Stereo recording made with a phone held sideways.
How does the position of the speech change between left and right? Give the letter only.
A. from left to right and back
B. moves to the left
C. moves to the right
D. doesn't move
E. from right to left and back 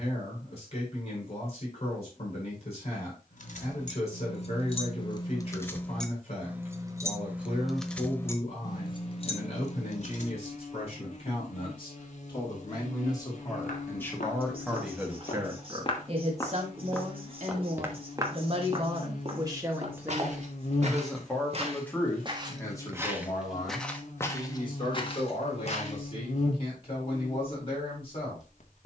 A.